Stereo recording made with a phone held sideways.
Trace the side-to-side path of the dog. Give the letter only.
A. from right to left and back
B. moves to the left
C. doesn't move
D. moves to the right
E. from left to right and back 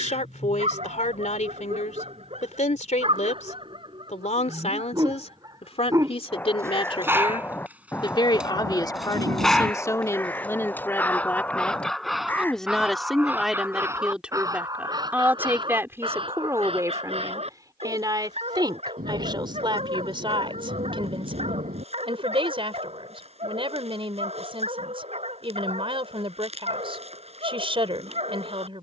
A.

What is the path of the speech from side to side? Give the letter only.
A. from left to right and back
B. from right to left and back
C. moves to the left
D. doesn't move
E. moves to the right
E.